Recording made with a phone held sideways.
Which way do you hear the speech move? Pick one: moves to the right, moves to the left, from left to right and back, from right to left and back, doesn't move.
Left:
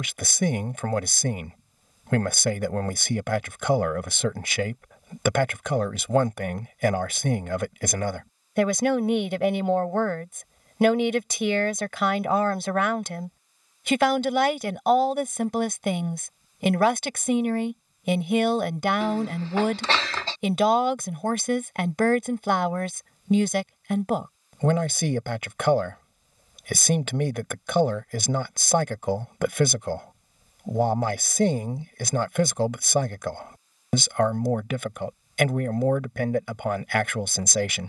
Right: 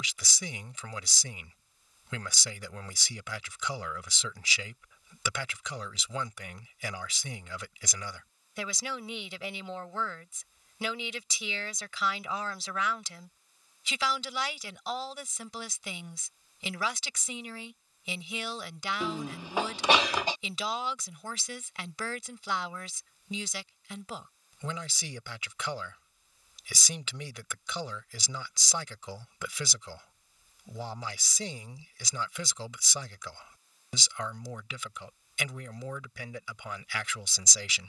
doesn't move.